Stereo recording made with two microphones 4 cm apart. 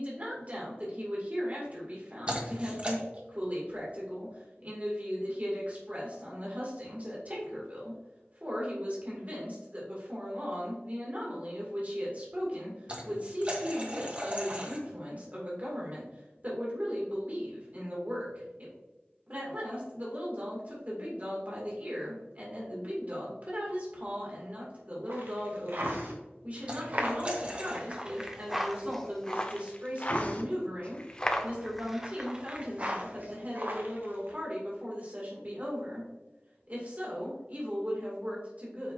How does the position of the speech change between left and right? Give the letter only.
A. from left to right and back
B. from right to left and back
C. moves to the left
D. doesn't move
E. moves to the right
D.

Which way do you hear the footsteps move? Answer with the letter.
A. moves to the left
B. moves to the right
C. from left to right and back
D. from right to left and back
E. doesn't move
D.